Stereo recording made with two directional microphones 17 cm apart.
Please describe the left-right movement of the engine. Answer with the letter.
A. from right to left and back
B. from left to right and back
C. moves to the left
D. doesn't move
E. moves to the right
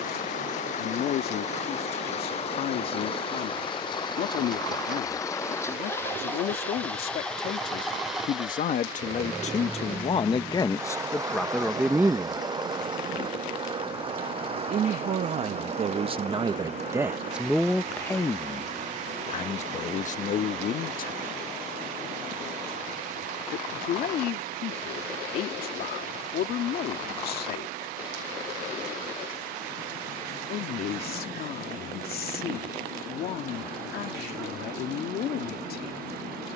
E.